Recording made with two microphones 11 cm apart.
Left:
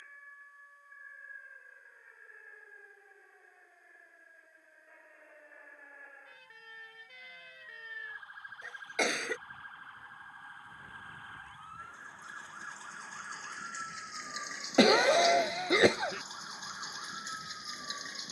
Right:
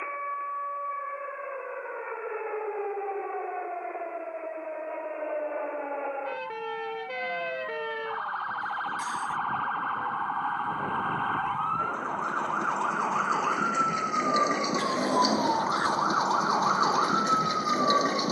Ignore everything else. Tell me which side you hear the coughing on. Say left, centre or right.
left.